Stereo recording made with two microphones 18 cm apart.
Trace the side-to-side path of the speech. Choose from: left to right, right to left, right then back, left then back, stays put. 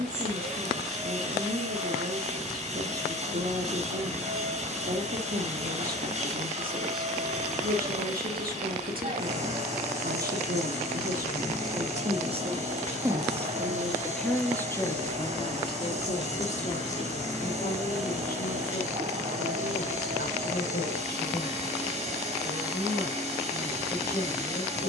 right to left.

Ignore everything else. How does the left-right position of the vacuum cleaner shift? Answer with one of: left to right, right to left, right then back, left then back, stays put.
stays put.